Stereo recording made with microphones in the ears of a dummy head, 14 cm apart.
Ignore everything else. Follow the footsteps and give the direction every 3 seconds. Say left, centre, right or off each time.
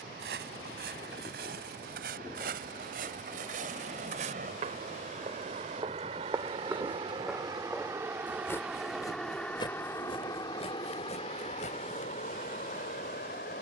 right, right, centre, left, off.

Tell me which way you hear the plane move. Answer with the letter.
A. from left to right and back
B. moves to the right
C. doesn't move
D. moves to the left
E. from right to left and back
D.